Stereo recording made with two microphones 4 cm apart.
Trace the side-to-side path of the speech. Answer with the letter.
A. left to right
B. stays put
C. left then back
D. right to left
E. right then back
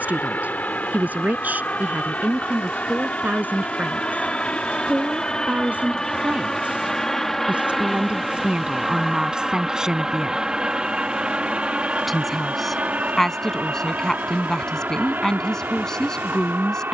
D.